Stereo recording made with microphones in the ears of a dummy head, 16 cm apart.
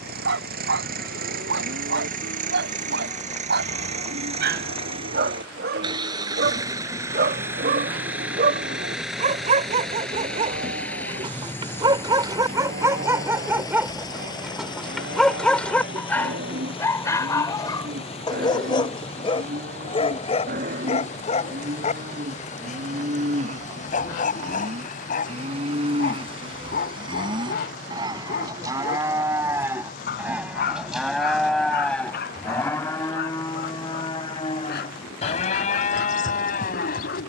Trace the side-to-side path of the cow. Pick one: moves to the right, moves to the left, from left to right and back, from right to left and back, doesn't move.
moves to the left.